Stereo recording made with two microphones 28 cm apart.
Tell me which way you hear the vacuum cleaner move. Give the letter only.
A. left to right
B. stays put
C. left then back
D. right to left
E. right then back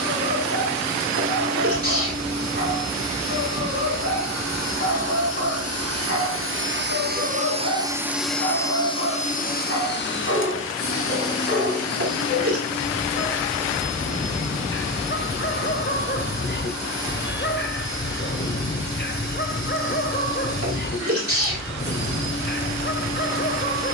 D.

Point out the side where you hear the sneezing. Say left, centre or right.
right.